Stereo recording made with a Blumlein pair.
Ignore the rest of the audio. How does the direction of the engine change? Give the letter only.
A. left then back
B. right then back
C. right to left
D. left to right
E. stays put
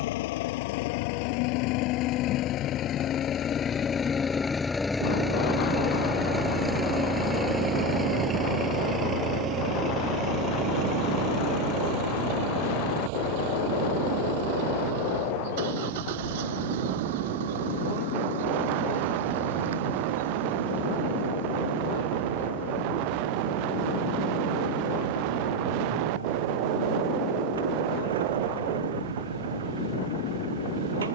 D.